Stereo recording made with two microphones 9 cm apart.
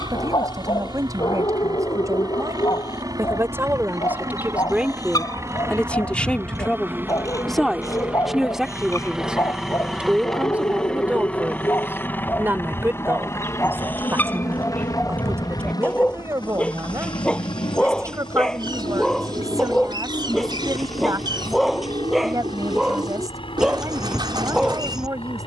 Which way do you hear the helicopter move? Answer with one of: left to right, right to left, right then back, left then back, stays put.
right to left.